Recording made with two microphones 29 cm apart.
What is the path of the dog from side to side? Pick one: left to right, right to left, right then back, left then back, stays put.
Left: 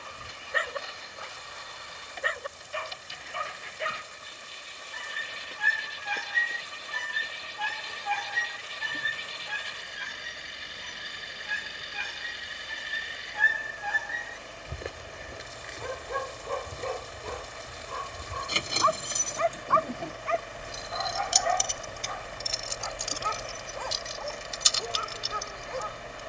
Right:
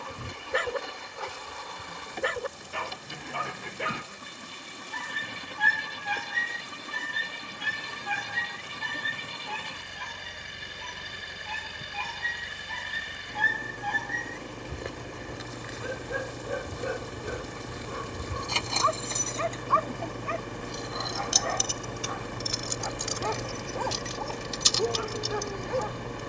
left then back.